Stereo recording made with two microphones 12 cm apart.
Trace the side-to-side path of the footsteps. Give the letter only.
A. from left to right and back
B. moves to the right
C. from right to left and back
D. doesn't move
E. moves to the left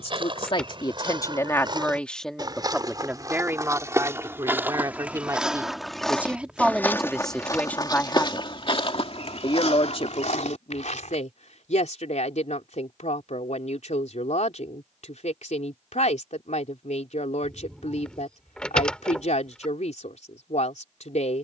E.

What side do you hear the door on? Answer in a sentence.
In this clip you hear the door in the centre.